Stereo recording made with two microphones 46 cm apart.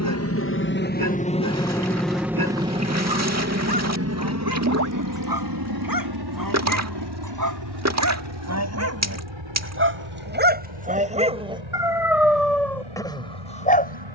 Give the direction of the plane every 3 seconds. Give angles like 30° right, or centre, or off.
10° left, 30° right, 50° right, 60° right, 70° right.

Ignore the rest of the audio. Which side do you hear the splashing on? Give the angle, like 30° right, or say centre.
30° right.